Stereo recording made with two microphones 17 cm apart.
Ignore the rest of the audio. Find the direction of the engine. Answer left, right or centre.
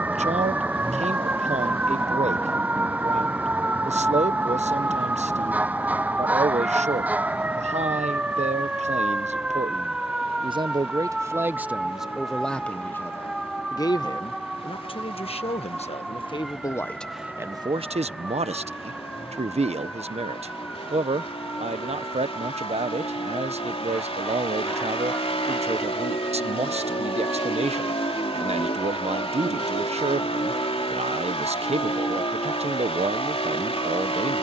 left.